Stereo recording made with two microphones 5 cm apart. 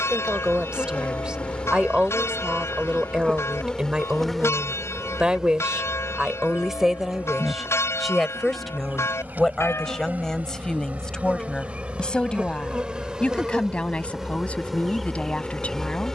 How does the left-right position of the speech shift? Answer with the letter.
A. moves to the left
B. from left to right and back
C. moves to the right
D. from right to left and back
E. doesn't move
A.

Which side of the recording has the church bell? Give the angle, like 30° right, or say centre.
70° left.